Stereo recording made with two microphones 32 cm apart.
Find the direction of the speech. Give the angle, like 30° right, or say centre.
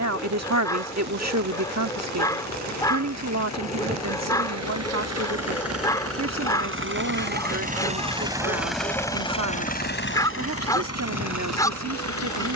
60° right.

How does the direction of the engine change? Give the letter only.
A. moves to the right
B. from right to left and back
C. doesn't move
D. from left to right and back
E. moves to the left
E.